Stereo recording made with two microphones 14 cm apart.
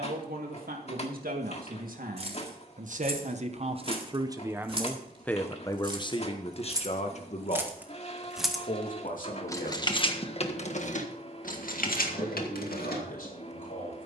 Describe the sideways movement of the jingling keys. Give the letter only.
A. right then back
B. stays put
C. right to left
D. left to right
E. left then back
C.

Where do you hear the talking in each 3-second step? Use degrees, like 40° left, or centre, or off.
70° right, 20° right, 50° left, 60° left, 70° left.